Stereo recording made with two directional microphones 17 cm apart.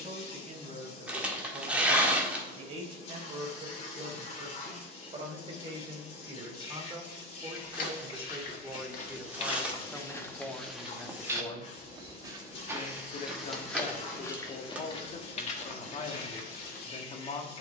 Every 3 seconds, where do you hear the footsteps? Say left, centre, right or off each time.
off, off, left, centre, centre, left.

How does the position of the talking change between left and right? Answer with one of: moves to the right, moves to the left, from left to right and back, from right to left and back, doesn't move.
moves to the left.